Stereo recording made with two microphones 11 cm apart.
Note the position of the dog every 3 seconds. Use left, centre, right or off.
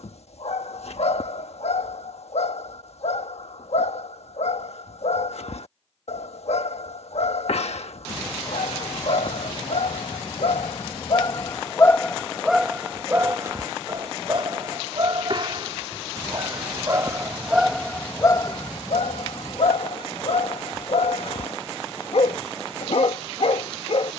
left, left, left, left, right, right, left, left.